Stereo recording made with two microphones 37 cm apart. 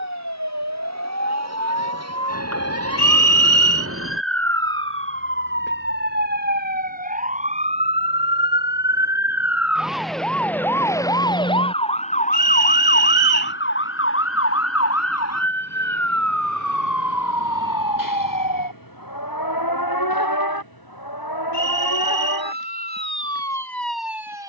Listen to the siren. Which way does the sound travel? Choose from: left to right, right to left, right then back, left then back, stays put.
right to left.